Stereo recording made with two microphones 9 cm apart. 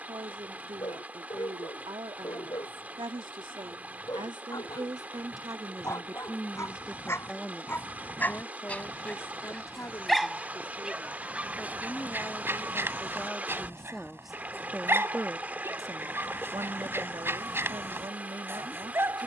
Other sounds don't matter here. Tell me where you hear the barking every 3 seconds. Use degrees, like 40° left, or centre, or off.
50° left, 40° left, 30° left, centre, 30° right, 30° right, 30° right.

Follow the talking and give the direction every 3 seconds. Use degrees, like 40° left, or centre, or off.
70° right, 50° right, centre, 30° left, 10° left, 40° right, 60° right.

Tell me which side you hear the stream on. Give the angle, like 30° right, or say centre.
20° right.